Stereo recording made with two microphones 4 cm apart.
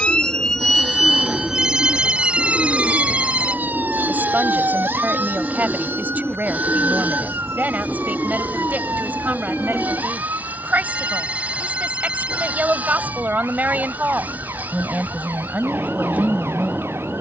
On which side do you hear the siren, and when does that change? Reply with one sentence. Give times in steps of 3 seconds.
In this clip you hear the siren in the centre from 0 s and on the right from 3 s.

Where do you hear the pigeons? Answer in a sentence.
You can hear the pigeons in the centre.